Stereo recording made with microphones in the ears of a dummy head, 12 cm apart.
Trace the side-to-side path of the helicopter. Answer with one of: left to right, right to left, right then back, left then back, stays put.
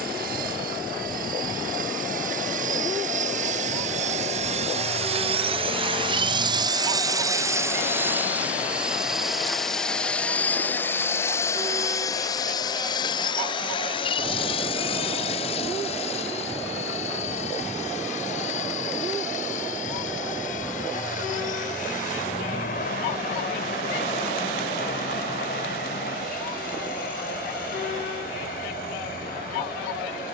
right to left.